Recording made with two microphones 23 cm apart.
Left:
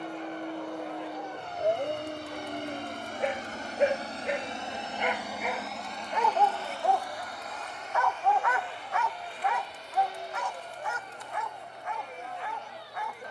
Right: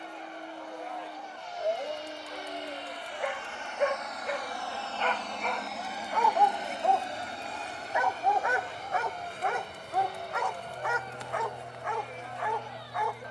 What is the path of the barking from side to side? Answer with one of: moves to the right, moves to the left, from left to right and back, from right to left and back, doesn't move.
moves to the right.